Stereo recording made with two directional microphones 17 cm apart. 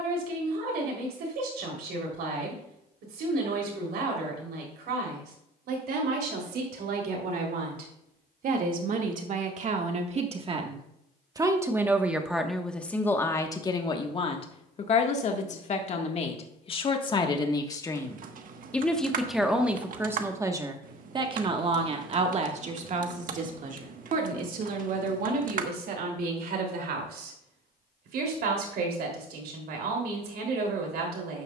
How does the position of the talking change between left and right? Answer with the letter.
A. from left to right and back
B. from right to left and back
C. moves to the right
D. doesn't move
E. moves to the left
B.